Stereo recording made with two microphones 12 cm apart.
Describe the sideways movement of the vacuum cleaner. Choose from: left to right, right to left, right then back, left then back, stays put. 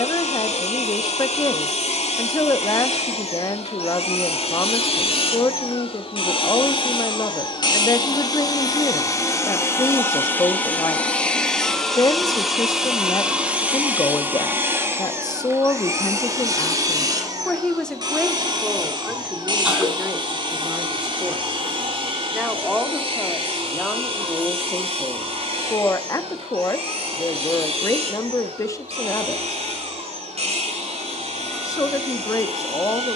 left to right.